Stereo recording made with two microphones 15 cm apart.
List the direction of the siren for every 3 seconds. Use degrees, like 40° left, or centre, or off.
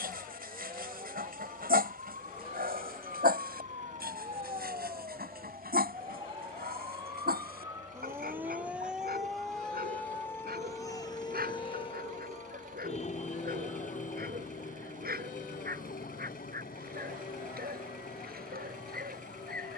50° right, 40° right, 20° right, 20° left, 50° left, 70° left, 80° left.